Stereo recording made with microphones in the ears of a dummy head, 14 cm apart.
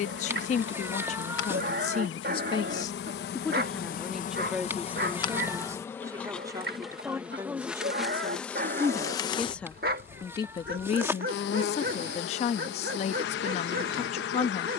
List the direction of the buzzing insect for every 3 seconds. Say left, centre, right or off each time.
left, left, centre, left, left.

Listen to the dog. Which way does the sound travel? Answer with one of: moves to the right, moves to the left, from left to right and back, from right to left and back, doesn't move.
doesn't move.